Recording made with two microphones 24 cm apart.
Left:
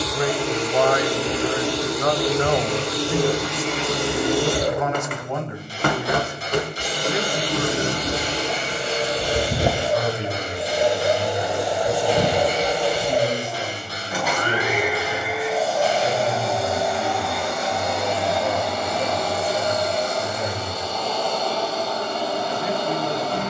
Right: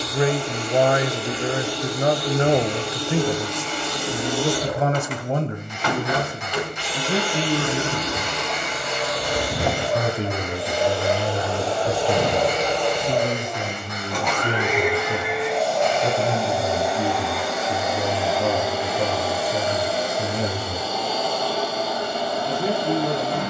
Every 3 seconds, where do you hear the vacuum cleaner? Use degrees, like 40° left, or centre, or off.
80° left, 60° left, 40° left, 20° left, 10° left, centre, 10° right, 10° right.